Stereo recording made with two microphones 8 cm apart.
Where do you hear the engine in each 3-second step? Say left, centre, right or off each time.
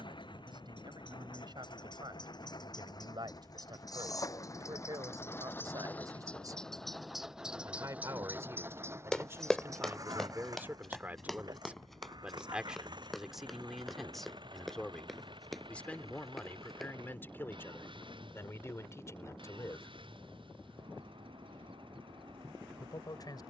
left, left, centre, right, right, right, right, right.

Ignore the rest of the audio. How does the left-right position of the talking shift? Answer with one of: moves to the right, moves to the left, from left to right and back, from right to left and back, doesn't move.
moves to the left.